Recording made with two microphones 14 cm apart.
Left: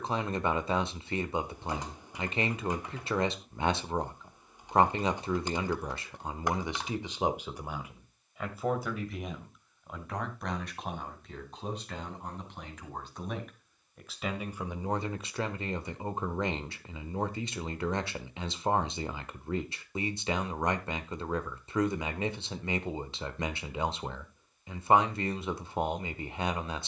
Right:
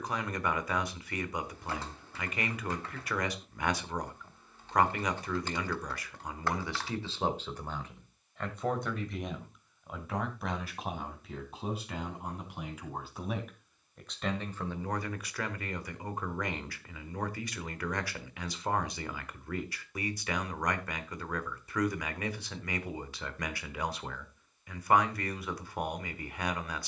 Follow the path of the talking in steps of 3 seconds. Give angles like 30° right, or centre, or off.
30° left, 30° left, 10° left, centre, centre, 20° left, 20° left, 20° left, 20° left.